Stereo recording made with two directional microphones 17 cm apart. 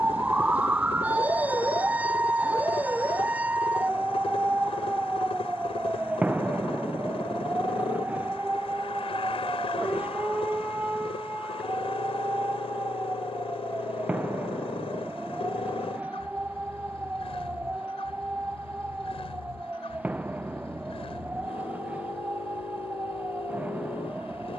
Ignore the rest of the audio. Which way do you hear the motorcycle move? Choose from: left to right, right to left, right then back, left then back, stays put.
stays put.